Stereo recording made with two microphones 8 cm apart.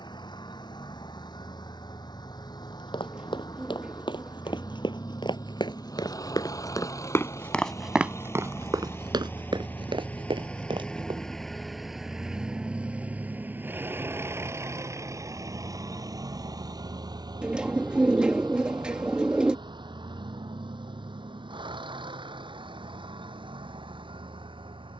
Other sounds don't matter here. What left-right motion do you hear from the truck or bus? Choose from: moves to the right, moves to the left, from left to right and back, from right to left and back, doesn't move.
moves to the right.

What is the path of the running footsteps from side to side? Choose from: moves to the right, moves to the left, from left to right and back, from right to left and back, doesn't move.
moves to the right.